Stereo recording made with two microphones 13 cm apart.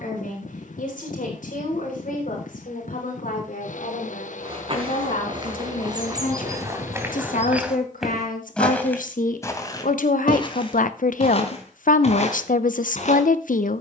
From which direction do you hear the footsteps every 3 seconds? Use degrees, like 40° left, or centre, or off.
off, 40° right, 10° right, 40° left, 60° left.